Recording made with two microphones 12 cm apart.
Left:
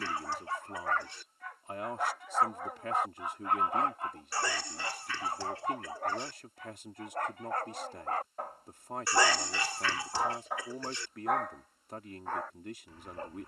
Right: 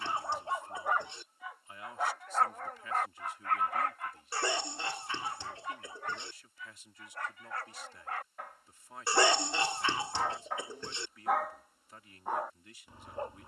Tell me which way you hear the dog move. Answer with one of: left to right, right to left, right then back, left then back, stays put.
left then back.